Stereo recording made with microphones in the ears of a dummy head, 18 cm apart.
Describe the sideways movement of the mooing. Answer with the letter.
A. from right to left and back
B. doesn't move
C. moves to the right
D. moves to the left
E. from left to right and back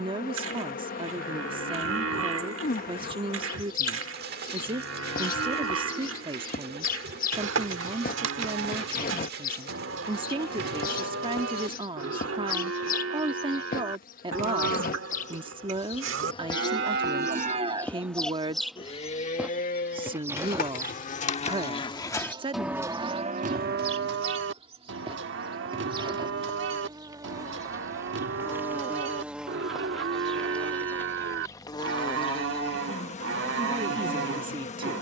A.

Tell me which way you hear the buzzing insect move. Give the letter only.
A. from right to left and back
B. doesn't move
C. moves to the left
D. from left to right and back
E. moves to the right
D.